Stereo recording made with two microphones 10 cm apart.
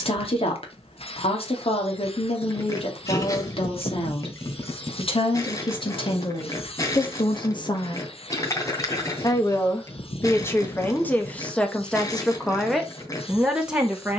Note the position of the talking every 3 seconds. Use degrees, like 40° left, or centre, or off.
70° left, 70° left, 60° left, 20° left, centre.